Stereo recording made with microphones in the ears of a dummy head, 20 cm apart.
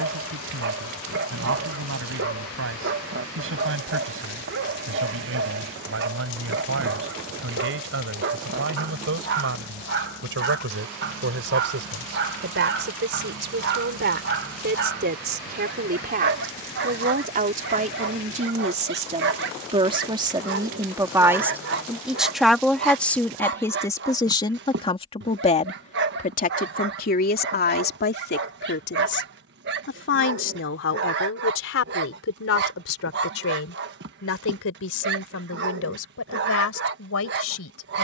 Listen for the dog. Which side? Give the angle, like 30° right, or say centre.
50° right.